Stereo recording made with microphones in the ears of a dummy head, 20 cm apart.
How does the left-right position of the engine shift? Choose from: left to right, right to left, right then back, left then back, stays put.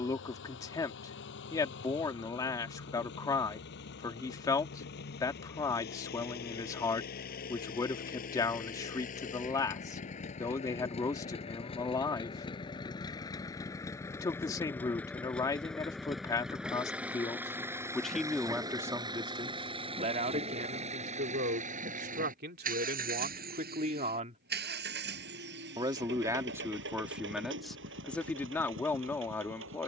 left to right.